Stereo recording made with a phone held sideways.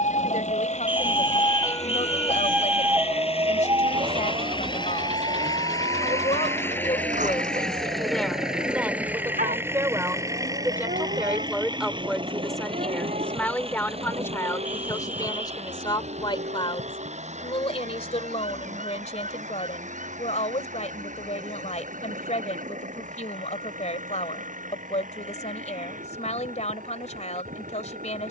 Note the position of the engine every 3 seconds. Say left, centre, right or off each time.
left, left, centre, right, right, right, right, right, right, right.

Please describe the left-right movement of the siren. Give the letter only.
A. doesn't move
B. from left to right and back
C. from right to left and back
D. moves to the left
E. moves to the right
E.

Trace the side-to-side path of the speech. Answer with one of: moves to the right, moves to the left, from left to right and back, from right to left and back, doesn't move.
from left to right and back.